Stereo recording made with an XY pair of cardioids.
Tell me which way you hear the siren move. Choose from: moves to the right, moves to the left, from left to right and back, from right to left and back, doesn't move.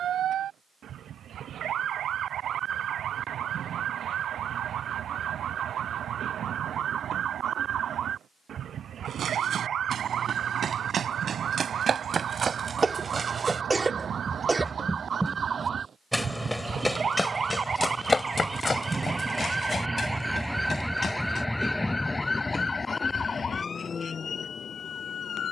moves to the left.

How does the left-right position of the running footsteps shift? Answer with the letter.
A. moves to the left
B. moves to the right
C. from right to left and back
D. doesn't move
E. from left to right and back
A.